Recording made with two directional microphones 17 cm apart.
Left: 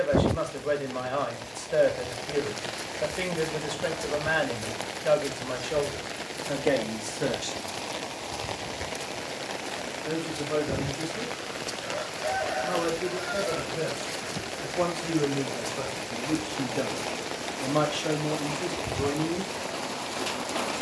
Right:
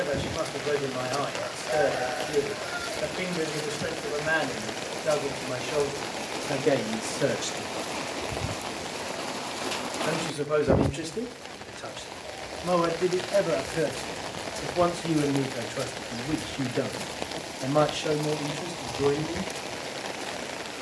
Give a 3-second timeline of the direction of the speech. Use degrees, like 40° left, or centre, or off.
10° left, 10° left, 10° right, 50° right, 30° right, 10° right, 10° left.